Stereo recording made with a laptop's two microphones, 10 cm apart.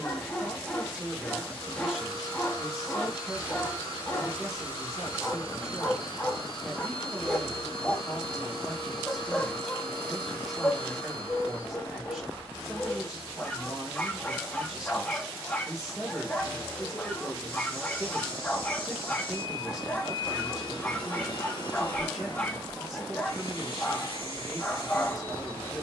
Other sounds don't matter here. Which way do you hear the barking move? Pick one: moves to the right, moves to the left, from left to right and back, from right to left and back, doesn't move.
doesn't move.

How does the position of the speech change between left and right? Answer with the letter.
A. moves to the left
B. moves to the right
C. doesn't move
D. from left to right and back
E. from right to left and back
C.